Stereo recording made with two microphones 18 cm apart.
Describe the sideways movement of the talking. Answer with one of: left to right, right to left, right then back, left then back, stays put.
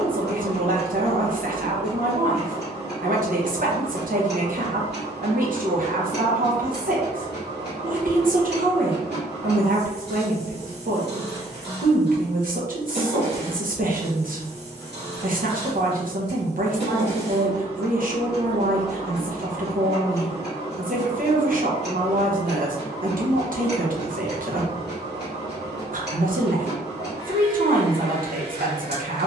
stays put.